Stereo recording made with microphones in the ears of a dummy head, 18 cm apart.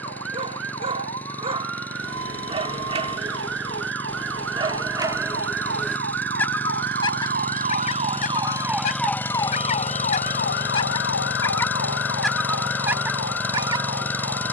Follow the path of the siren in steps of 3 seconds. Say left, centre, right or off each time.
right, right, right, left, left.